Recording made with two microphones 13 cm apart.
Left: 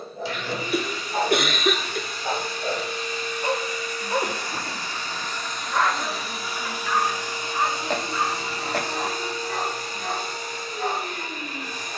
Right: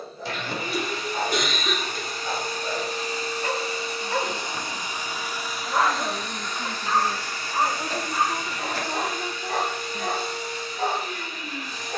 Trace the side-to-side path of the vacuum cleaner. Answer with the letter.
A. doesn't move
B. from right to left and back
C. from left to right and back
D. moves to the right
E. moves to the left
E.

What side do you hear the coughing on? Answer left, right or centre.
left.